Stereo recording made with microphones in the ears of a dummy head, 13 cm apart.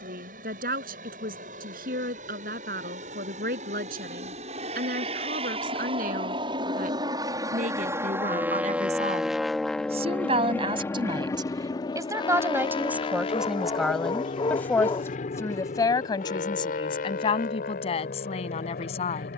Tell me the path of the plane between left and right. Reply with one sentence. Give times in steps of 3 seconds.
In this clip you hear the plane on the right from 0 s, in the centre from 9 s and on the left from 12 s.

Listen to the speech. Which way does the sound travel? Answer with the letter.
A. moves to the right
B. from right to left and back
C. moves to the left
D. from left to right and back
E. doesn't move
C.